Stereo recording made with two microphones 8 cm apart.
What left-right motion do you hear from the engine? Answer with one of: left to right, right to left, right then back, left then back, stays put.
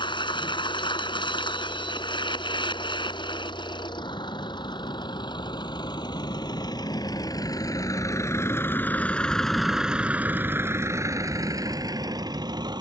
left to right.